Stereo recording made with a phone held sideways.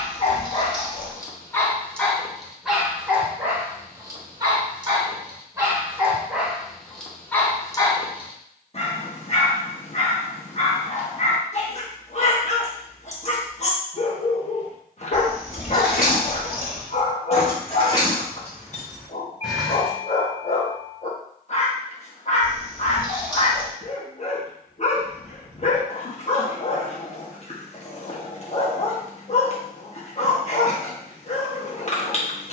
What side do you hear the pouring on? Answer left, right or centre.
left.